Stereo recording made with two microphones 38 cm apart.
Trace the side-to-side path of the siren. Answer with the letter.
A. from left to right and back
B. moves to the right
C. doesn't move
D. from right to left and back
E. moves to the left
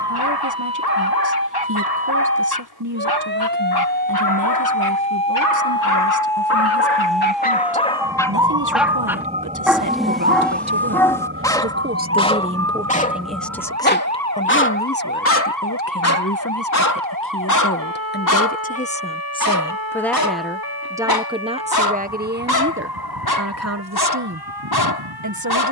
B.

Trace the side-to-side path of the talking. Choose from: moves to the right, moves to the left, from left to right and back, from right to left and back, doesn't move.
from right to left and back.